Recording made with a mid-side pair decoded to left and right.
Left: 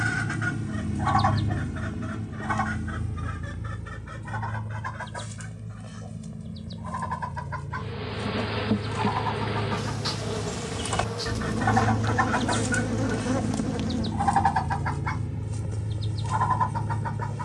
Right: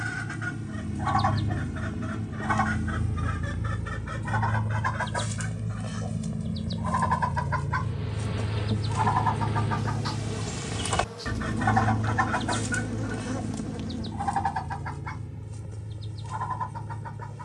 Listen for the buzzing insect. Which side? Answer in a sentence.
In this clip you hear the buzzing insect on the left.